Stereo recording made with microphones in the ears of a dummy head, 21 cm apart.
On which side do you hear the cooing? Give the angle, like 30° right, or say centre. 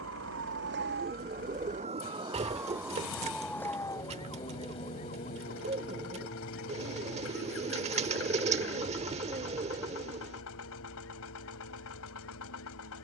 30° right.